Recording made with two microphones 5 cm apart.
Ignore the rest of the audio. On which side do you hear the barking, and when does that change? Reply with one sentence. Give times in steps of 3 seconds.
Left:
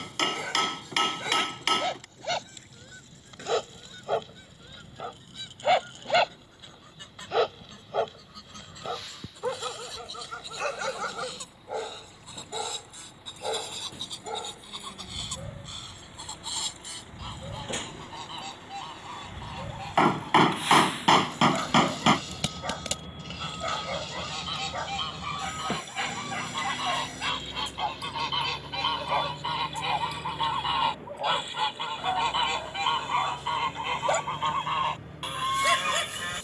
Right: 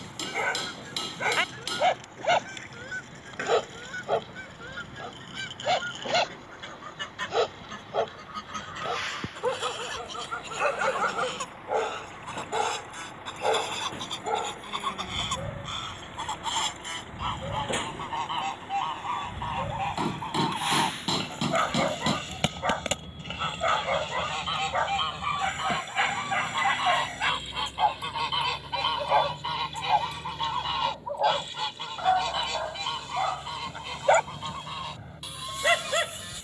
You can hear the barking on the right from 0 s, in the centre from 3 s and on the right from 9 s.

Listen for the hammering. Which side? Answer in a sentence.
In this clip you hear the hammering on the left.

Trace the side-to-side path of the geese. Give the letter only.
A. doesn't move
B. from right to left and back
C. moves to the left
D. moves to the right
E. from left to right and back
C.